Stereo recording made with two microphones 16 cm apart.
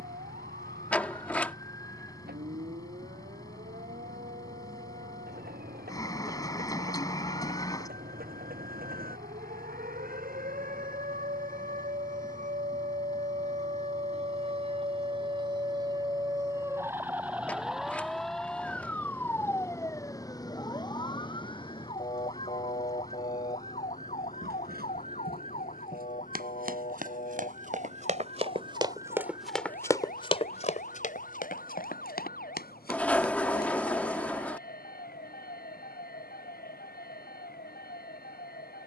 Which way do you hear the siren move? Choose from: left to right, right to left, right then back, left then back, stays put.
right to left.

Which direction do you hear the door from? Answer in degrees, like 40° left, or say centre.
10° left.